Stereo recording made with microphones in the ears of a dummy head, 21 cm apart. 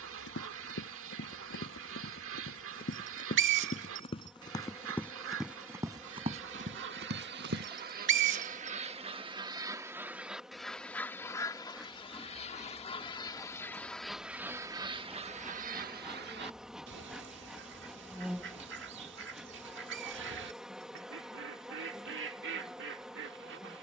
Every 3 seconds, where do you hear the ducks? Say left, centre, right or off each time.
right, right, right, centre, centre, right, right, right.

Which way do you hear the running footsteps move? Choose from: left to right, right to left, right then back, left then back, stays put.
left to right.